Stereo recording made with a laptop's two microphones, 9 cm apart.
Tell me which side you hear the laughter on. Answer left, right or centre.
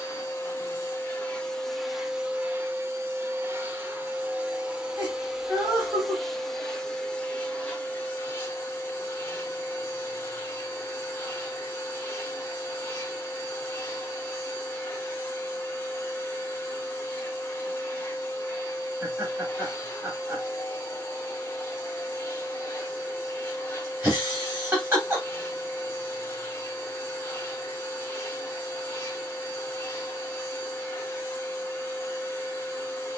right.